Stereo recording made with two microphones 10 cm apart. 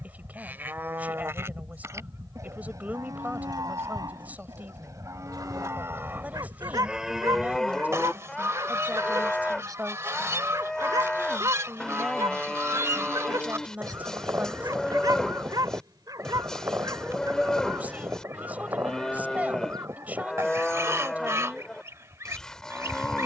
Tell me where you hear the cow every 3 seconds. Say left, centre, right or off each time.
right, right, centre, centre, centre, centre, centre, centre.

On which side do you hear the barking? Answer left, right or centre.
right.